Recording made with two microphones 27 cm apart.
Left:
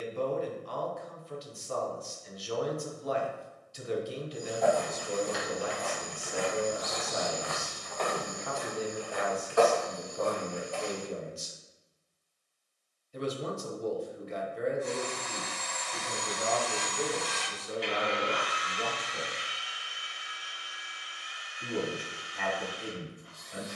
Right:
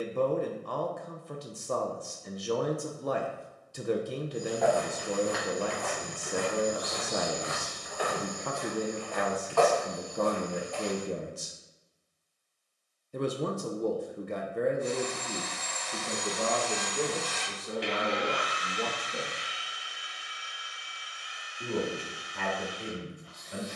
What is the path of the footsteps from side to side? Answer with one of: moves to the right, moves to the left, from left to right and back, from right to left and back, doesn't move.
moves to the left.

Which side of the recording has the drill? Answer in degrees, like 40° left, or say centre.
centre.